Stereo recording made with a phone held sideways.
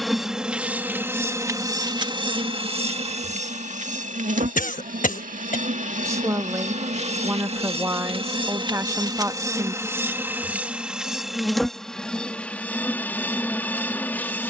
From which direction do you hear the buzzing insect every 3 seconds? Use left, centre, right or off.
right, right, right, centre, centre.